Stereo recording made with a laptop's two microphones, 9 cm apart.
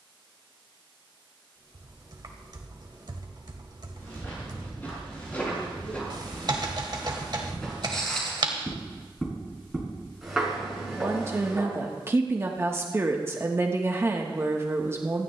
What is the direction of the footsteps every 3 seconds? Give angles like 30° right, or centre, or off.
off, 20° left, 10° left, 10° right, off.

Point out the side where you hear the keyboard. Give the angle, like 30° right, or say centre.
50° right.